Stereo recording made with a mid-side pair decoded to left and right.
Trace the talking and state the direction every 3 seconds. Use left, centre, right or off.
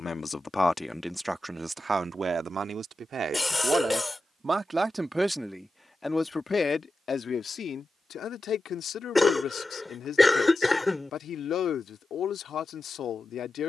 centre, right, left, left, left.